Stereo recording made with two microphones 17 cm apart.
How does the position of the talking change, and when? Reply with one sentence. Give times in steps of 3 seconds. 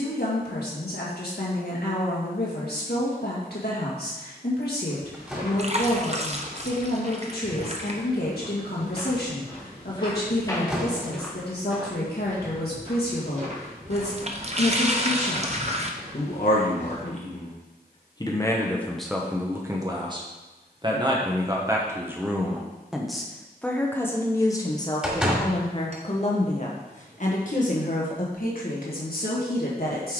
In this clip you hear the talking on the left from 0 s, in the centre from 18 s and on the left from 24 s.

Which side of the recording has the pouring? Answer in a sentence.
You can hear the pouring on the right.